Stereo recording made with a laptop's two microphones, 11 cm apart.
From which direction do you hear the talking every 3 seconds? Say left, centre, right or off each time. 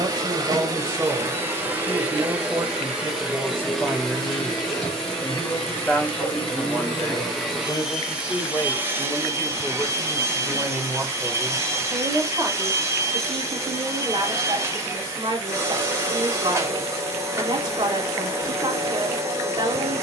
right, centre, left, centre, right, right, right.